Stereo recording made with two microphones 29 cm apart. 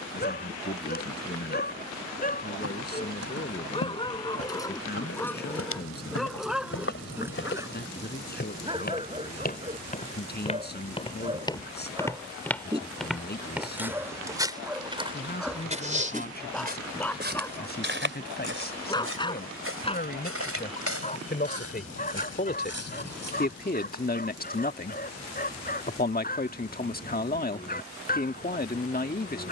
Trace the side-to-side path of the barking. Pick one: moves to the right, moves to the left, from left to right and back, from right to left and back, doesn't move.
from left to right and back.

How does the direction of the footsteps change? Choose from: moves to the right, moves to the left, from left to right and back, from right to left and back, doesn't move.
moves to the right.